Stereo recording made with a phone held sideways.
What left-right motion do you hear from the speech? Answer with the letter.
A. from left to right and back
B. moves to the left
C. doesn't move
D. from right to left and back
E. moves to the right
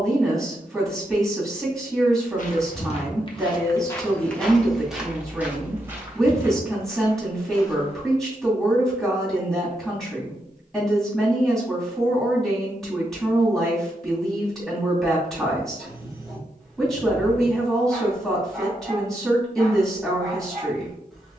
C.